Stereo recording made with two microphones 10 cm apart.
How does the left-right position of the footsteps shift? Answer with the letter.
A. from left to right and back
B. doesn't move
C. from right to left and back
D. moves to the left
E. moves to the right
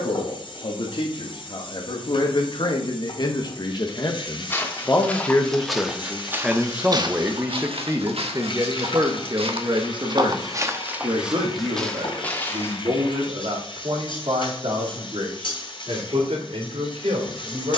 A.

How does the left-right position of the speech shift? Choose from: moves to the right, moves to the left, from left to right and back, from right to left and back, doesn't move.
moves to the right.